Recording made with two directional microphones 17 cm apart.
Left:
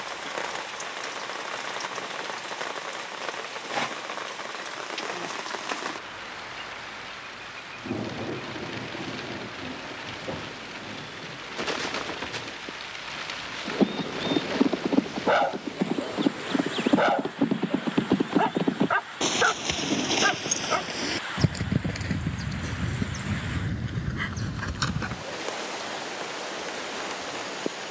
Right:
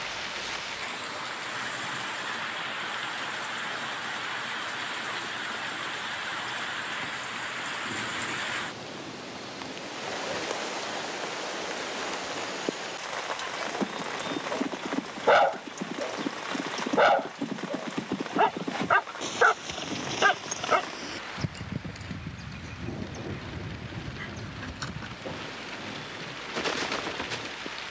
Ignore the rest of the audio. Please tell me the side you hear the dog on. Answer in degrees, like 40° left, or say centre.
10° right.